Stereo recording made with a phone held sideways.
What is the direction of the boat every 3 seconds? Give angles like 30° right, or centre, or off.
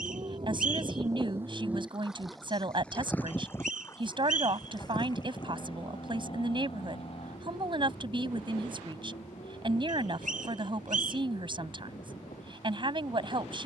10° right, 30° left, 40° left, 50° left, 60° left.